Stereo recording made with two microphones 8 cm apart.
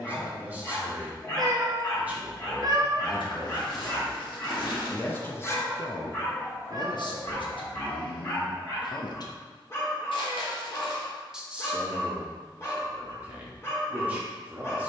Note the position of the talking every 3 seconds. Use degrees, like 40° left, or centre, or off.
20° right, 10° left, 70° left, 10° left, 20° right.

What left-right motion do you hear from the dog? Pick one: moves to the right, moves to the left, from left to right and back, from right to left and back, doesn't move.
doesn't move.